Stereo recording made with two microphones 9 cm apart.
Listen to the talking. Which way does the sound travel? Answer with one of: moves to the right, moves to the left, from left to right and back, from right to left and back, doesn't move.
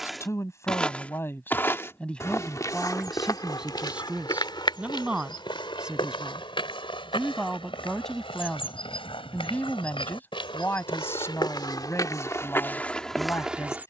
from left to right and back.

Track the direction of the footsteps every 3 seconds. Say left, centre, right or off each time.
left, left, left, left, centre.